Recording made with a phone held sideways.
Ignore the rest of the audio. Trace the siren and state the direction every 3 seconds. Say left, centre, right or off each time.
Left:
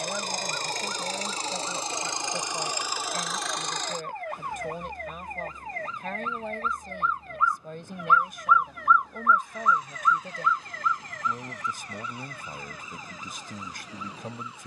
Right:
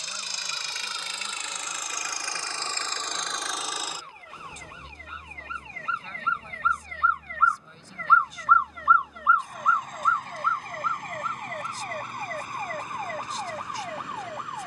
left, left, left, right, right.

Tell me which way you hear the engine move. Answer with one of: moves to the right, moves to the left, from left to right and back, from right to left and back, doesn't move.
moves to the right.